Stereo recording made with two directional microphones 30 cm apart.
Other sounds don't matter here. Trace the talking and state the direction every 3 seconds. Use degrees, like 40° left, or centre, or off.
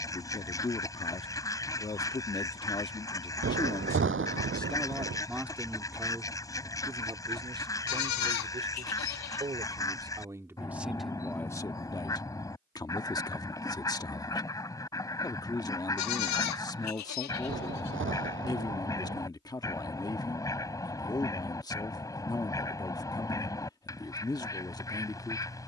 20° left, centre, 20° right, centre, 10° left, 10° left, 10° left, 10° left, 10° left.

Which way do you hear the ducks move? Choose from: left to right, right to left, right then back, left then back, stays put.
stays put.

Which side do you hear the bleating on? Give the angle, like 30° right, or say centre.
70° left.